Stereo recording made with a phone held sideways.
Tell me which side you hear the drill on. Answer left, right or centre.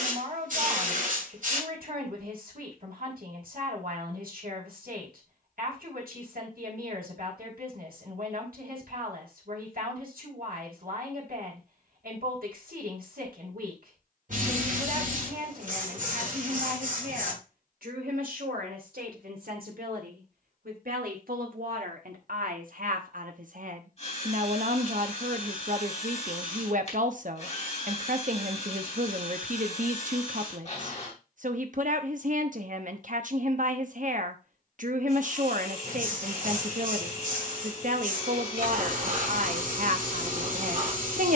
left.